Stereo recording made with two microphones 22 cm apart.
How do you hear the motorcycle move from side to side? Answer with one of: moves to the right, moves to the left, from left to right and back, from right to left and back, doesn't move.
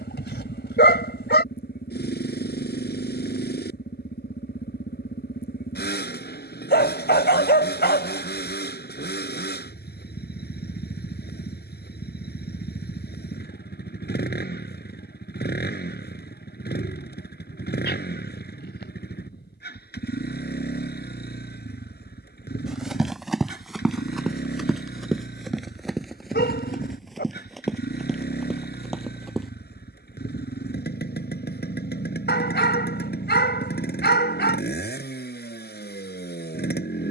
doesn't move.